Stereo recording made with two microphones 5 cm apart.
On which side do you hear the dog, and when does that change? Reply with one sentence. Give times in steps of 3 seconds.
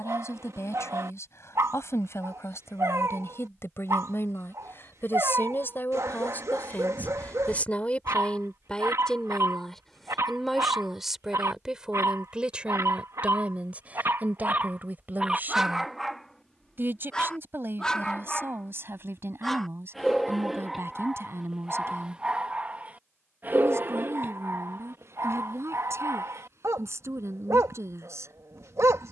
In this clip you hear the dog on the right from 0 s, in the centre from 15 s and on the right from 21 s.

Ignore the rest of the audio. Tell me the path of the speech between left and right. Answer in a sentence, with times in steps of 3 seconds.
In this clip you hear the speech on the left from 0 s, in the centre from 9 s and on the right from 12 s.